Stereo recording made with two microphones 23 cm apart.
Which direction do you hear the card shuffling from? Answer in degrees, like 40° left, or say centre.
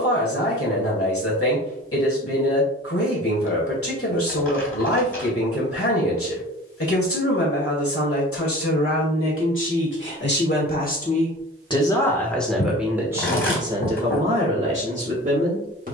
60° left.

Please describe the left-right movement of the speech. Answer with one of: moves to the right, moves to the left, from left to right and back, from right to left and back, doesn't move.
moves to the right.